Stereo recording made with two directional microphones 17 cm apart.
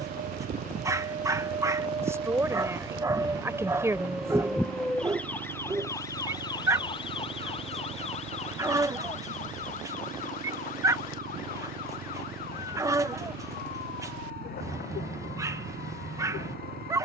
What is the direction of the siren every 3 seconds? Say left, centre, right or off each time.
right, centre, left, left, left, left.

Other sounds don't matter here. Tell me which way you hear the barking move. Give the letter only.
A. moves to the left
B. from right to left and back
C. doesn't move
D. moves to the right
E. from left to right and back
C.